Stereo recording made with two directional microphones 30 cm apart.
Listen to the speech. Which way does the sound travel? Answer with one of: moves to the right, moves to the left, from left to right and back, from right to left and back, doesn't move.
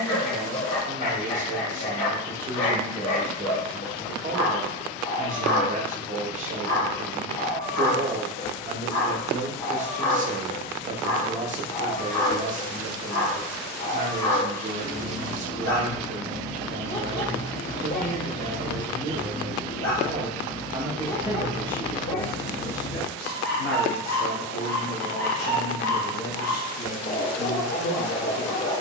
moves to the left.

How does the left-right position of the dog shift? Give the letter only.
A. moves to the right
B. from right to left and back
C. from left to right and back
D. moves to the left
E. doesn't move
E.